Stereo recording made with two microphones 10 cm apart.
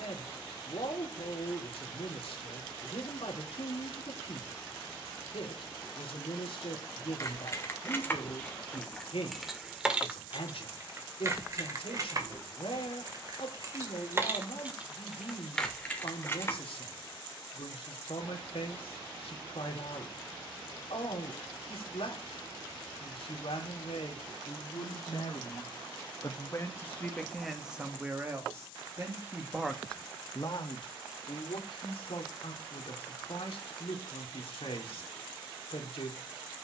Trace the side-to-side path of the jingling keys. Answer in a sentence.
In this clip you hear the jingling keys move from left to right and back again.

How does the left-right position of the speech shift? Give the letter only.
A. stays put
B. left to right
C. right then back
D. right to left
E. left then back
C.